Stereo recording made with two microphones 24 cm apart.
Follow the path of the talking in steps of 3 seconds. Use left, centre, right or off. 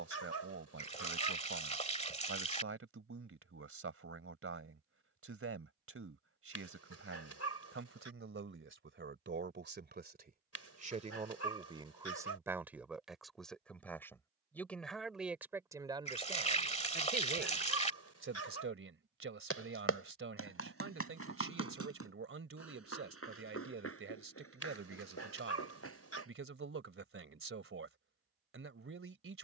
right, right, right, right, centre, right, right, right, right, right.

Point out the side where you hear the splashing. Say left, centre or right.
left.